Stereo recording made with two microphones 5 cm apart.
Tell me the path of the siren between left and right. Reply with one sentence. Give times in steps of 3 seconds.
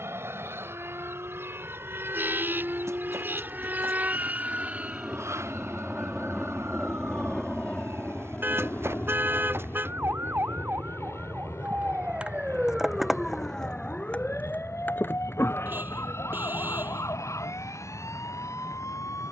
You can hear the siren on the right from 0 s, in the centre from 12 s and on the left from 15 s.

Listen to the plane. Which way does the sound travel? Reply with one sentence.
In this clip you hear the plane go from the right side to the left.